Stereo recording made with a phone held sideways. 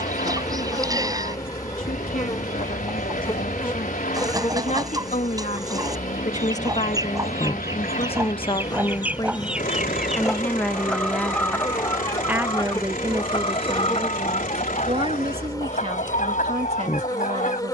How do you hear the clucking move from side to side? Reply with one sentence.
You can hear the clucking travel towards the left.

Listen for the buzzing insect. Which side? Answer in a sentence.
You can hear the buzzing insect on the left.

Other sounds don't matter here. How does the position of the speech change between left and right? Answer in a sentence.
In this clip you hear the speech move to the right.